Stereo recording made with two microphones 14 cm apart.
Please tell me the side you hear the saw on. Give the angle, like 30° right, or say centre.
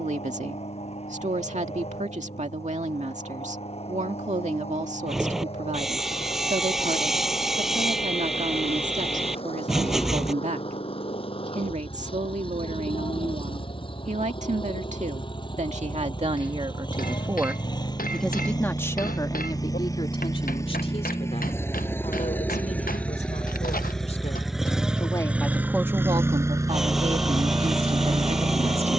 centre.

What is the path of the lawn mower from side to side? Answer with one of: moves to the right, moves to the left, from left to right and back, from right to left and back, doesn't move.
moves to the right.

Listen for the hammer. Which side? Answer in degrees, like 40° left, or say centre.
80° left.